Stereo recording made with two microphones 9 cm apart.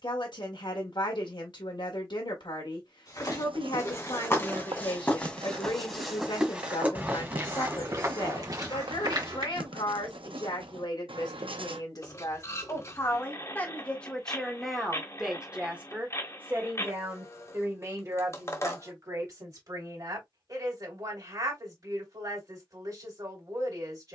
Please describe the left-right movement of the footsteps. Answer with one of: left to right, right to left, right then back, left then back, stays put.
left to right.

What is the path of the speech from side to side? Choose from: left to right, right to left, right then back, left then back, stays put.
left to right.